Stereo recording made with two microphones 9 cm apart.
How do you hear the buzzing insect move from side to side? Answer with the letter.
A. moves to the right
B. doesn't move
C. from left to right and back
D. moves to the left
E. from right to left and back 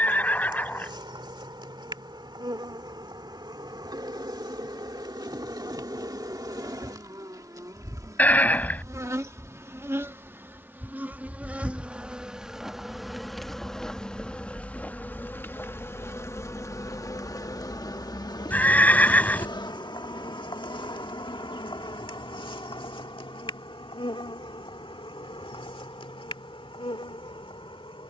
D.